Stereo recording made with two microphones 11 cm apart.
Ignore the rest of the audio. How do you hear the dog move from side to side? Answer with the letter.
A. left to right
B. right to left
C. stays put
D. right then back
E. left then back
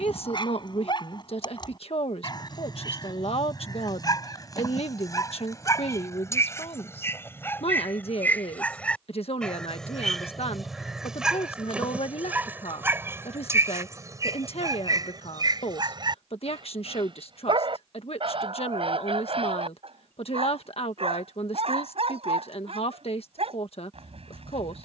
A.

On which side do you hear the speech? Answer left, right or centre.
left.